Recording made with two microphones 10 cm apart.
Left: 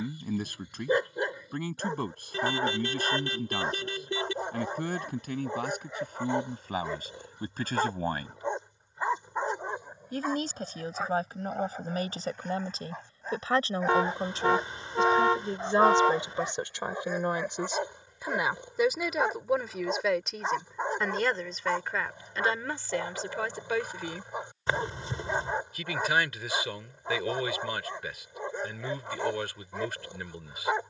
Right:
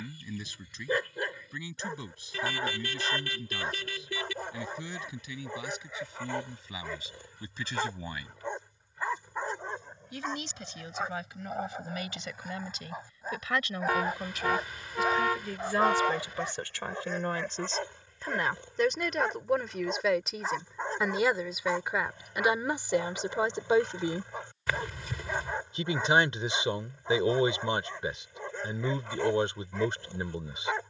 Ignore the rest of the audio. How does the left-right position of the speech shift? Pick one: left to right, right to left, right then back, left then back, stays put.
left to right.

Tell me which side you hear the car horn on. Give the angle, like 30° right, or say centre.
30° left.